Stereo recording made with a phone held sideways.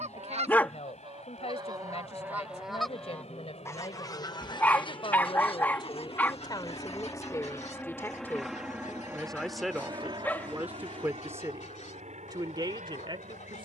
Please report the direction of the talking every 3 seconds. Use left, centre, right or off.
left, left, left, centre, right.